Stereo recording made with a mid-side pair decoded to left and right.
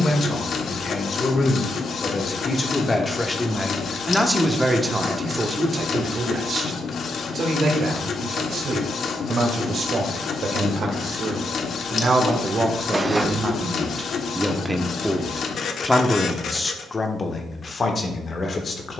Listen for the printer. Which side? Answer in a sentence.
You can hear the printer on the left.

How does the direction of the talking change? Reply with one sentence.
In this clip you hear the talking move from left to right and back again.